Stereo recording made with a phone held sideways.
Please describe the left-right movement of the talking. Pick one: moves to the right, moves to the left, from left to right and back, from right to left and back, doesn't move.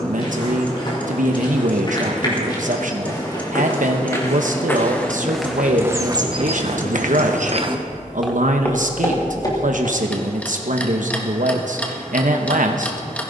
doesn't move.